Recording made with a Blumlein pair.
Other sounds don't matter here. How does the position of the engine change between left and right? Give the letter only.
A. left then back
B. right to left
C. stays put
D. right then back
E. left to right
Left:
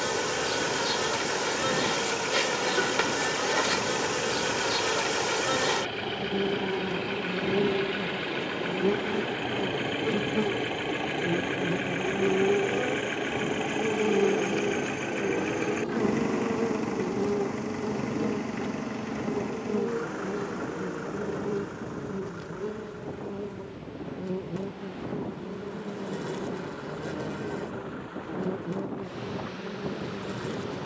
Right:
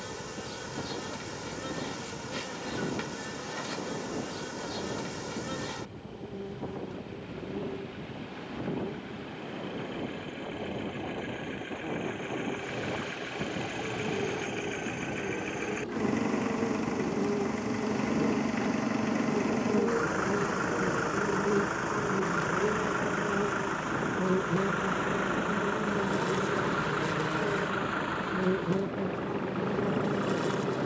E.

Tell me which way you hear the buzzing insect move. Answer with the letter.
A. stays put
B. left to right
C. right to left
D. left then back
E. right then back
B.